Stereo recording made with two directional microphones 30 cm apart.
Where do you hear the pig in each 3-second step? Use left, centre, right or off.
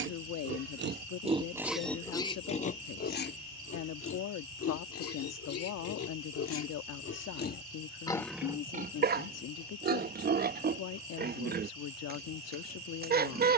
centre, left, left, right, right.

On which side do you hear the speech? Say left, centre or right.
left.